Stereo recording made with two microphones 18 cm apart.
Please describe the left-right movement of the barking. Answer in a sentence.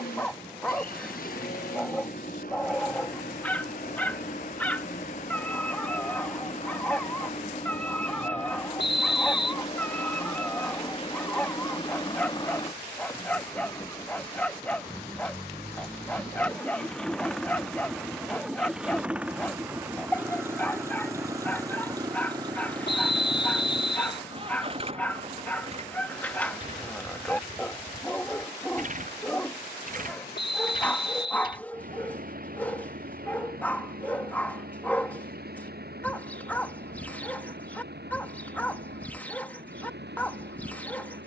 You can hear the barking stay put.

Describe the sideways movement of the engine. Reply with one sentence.
You can hear the engine travel towards the right.